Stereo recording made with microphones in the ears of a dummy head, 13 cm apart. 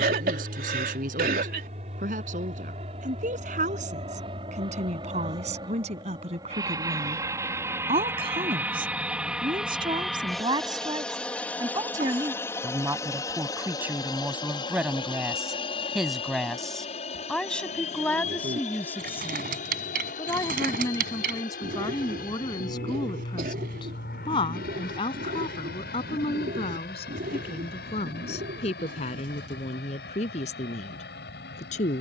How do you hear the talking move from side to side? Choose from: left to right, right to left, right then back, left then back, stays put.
right to left.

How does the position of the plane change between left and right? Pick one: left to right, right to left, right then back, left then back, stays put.
right to left.